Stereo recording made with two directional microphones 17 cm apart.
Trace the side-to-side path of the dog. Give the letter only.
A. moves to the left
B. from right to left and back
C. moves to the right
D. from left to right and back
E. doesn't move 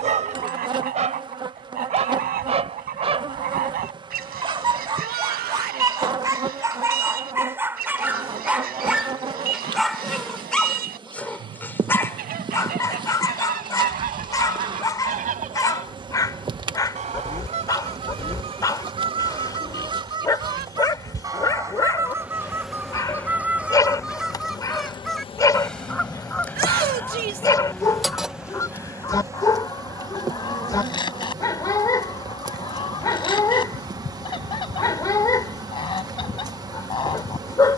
A.